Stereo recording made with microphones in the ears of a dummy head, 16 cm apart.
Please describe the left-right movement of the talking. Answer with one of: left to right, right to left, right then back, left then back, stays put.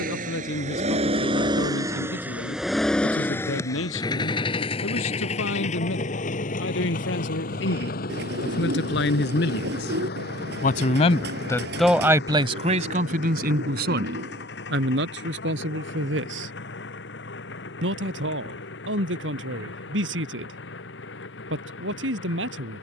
left to right.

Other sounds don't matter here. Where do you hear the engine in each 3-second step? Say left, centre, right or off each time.
right, left, left, left, left, left, left, left.